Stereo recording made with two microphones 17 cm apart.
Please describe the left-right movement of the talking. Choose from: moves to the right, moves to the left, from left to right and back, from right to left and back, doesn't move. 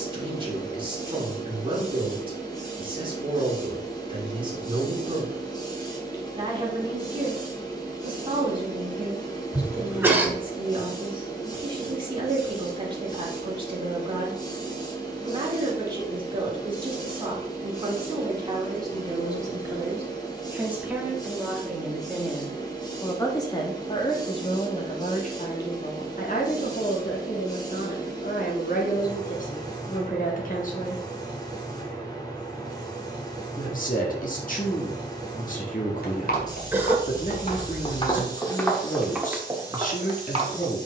moves to the left.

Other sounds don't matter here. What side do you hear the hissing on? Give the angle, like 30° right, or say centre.
20° left.